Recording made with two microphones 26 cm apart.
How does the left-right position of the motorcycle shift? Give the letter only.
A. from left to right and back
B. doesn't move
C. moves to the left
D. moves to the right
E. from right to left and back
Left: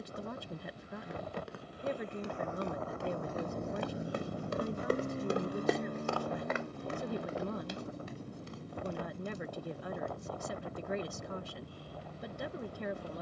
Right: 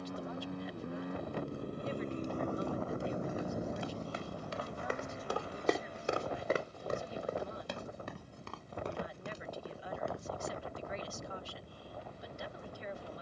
C.